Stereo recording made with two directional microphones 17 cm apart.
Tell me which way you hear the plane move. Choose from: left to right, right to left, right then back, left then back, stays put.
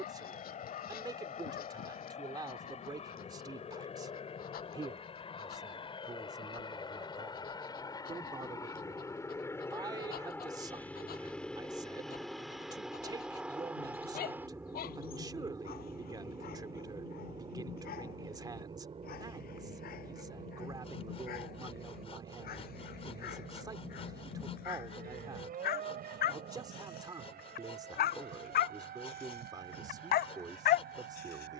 left to right.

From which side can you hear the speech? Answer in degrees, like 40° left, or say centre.
20° right.